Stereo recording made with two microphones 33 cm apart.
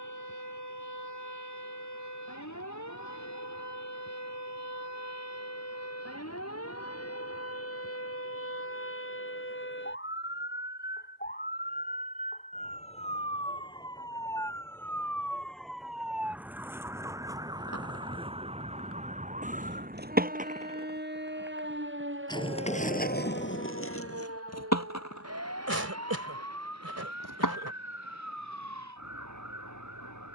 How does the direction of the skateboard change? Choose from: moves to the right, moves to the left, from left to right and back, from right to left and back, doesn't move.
moves to the left.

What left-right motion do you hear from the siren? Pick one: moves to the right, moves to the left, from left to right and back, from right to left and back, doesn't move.
moves to the right.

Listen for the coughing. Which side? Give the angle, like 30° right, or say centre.
50° right.